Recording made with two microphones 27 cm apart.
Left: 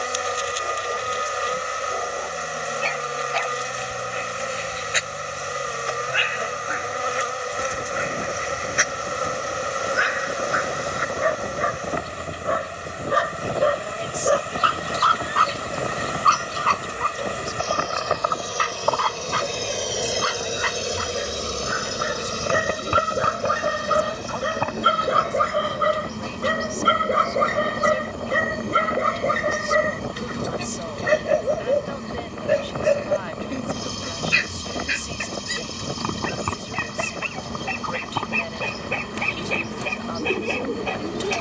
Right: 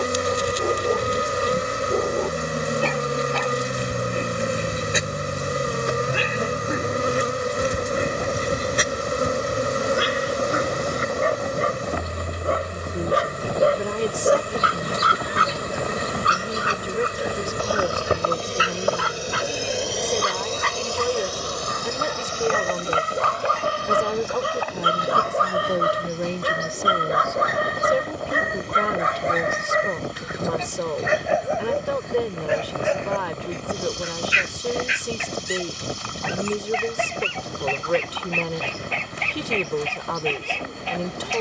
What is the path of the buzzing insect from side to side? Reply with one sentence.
You can hear the buzzing insect go from the right side to the left.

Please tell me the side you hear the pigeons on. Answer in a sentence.
In this clip you hear the pigeons on the left.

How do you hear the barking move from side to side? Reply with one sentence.
In this clip you hear the barking move from right to left.